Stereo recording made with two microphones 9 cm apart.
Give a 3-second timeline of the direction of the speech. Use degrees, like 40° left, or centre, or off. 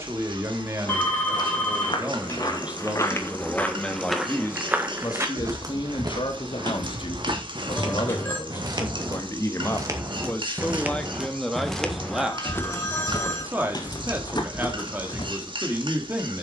20° right, 20° left, 50° left, 20° left, 20° right, 20° right.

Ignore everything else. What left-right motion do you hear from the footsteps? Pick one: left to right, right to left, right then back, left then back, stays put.
right then back.